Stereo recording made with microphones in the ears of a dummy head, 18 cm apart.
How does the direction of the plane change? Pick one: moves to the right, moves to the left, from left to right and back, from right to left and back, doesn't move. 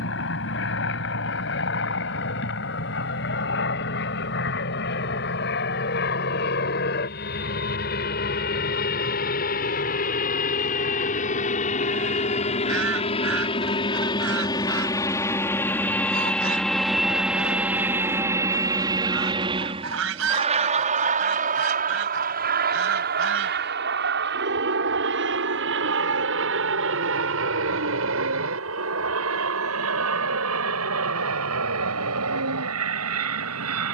moves to the right.